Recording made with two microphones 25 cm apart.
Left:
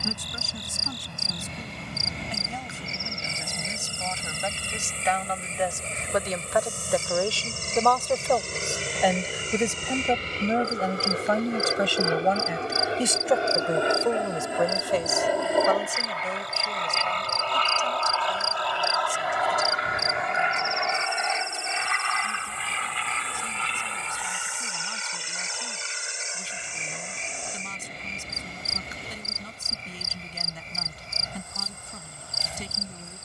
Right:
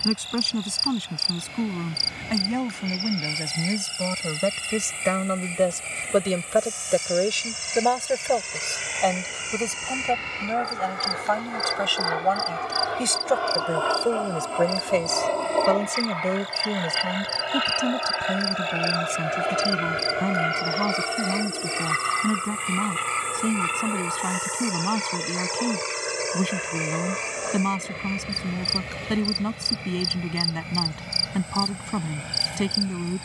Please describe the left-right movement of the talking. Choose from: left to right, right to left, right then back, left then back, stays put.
left then back.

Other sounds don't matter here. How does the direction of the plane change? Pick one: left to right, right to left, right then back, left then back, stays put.
left to right.